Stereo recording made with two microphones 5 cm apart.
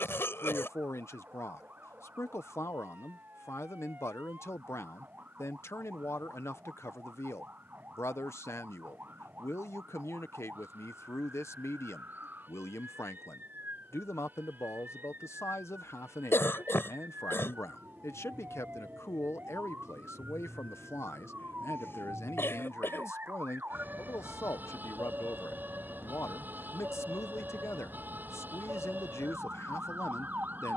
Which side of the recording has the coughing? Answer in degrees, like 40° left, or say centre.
60° left.